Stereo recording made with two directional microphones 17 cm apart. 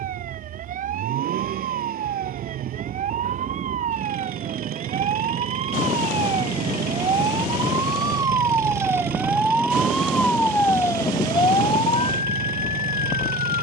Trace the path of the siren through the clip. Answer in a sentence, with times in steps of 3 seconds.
You can hear the siren on the right from 0 s, in the centre from 9 s and on the left from 12 s.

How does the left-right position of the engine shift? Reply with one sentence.
You can hear the engine stay in one place.